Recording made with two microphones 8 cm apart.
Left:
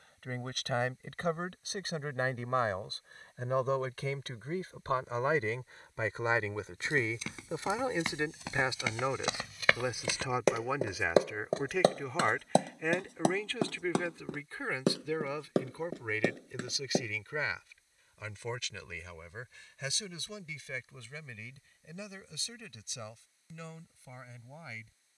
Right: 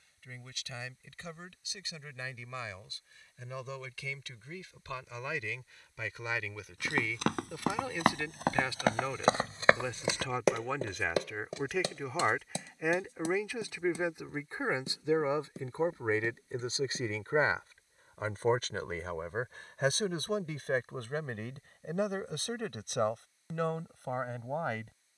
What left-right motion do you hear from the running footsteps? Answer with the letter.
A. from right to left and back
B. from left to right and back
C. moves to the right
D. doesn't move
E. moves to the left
E.